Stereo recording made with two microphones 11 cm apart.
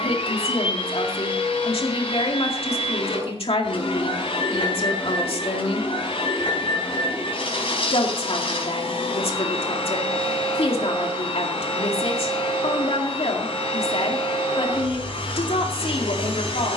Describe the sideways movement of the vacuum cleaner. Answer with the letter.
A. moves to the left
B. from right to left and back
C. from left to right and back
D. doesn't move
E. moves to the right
D.